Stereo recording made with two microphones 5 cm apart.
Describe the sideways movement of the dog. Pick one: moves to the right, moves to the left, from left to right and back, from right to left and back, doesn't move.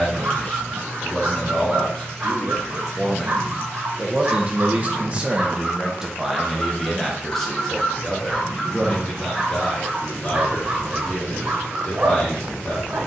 from right to left and back.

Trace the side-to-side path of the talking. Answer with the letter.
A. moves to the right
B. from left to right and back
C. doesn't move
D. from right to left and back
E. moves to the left
B.